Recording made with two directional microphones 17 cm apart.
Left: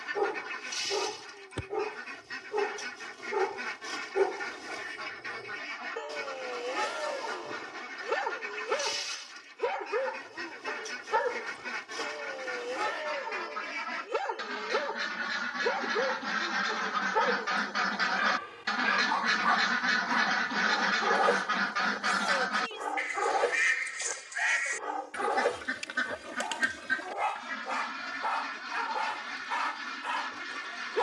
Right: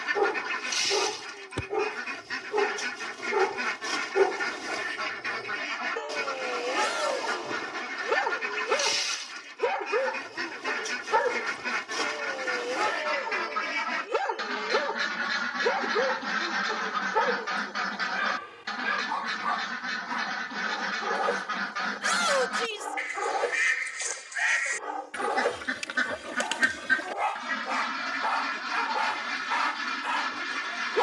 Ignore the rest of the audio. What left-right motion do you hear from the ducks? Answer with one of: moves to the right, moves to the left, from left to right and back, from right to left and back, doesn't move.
from right to left and back.